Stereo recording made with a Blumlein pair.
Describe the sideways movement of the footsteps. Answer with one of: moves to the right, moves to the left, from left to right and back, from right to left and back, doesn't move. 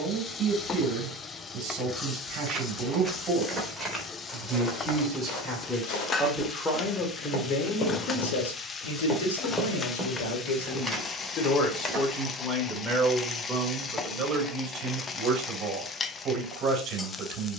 from right to left and back.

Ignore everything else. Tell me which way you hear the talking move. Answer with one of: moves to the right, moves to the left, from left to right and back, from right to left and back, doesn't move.
from right to left and back.